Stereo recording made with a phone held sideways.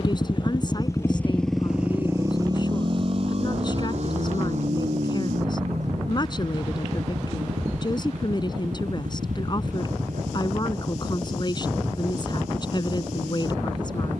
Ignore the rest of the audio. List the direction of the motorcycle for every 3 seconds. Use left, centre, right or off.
centre, right, right, right, right.